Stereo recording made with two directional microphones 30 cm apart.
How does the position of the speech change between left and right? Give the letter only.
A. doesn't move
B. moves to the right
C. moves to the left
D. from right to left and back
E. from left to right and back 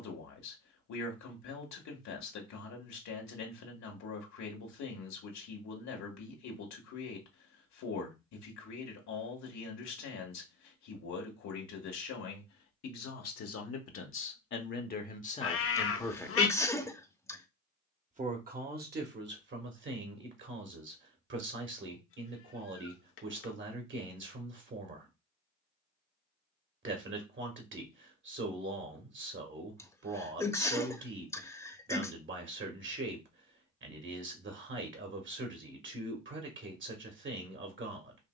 B.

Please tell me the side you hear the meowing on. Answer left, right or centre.
left.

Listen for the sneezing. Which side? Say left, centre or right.
centre.